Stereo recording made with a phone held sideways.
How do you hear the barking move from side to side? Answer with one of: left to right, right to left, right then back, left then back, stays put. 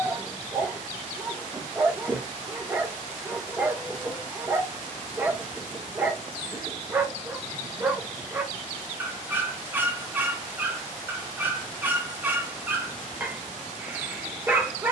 stays put.